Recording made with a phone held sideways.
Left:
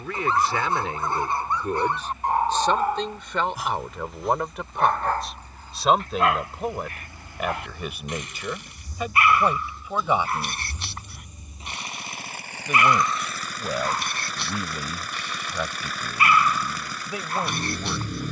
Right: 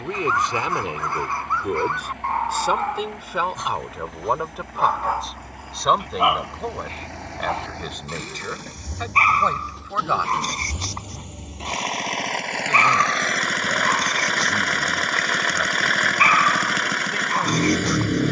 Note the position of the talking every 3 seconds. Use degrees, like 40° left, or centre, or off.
20° right, centre, 10° left, 10° left, 10° left, 10° left.